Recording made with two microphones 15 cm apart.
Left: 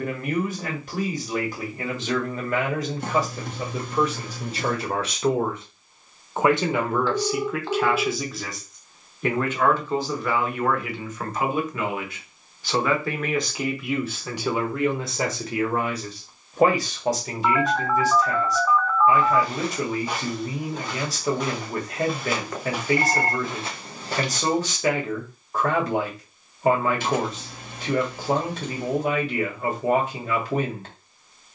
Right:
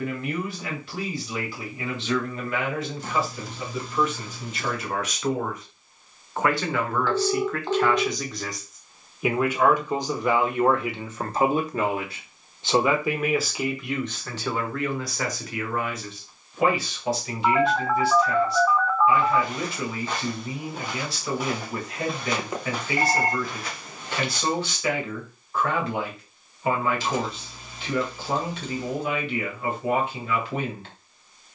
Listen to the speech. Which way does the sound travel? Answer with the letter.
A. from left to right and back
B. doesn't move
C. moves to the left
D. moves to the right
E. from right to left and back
A.